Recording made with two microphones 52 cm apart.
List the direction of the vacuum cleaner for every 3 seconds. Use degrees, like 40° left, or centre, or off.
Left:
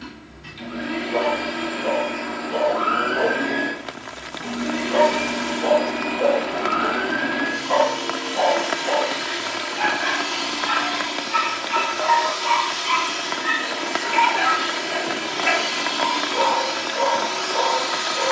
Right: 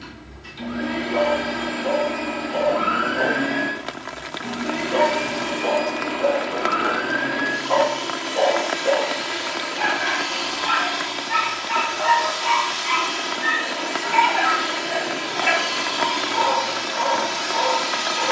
60° right, 20° right, 20° left, 40° left, 40° left, 10° right.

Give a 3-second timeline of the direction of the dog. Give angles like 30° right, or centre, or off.
70° left, 70° left, 40° left, 10° right, 20° right, 20° right.